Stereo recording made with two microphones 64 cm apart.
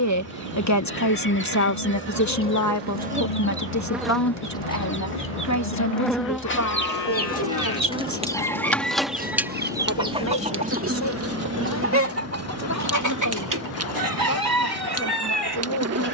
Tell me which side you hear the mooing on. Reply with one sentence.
You can hear the mooing on the left.